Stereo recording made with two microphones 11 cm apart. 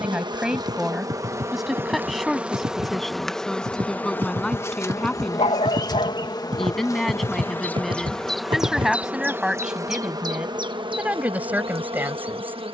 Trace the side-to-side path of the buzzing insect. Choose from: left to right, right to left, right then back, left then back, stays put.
left then back.